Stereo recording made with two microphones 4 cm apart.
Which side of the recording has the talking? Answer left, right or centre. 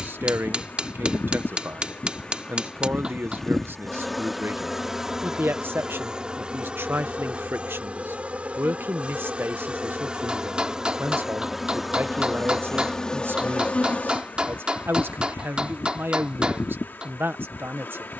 right.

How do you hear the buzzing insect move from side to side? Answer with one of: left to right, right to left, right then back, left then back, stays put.
right then back.